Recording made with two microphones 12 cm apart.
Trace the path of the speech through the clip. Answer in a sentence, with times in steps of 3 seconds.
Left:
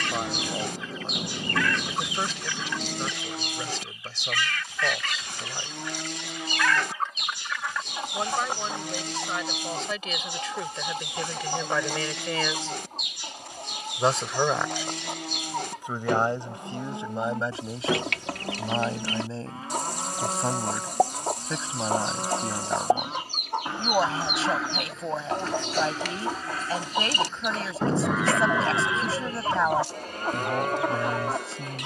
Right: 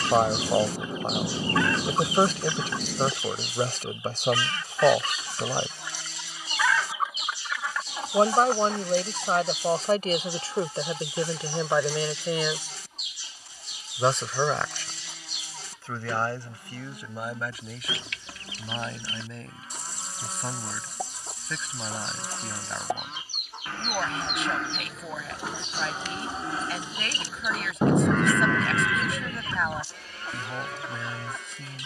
In this clip you hear the speech on the right from 0 s, in the centre from 12 s and on the left from 15 s.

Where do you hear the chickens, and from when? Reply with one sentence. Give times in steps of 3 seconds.
In this clip you hear the chickens on the right from 0 s, in the centre from 6 s and on the left from 9 s.